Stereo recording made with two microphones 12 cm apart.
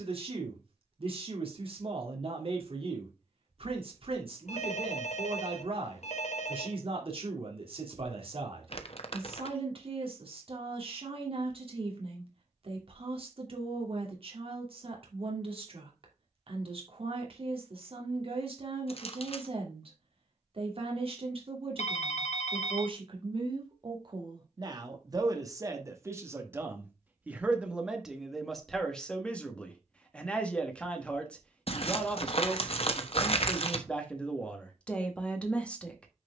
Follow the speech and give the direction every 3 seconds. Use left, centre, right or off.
right, right, right, right, right, right, right, right, right, centre, centre, centre.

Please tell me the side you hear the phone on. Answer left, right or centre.
left.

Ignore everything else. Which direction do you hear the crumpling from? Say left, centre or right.
left.